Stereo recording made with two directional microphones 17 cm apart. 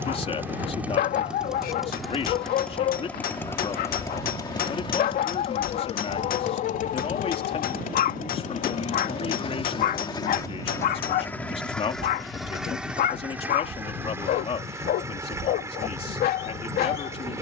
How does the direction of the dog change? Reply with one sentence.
You can hear the dog stay put.